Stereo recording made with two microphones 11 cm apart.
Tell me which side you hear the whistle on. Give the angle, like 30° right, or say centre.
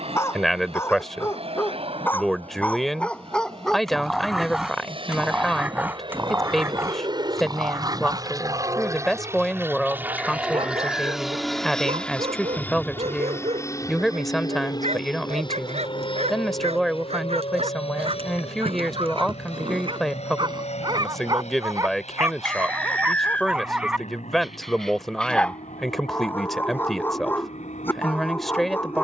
10° left.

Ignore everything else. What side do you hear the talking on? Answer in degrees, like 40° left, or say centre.
centre.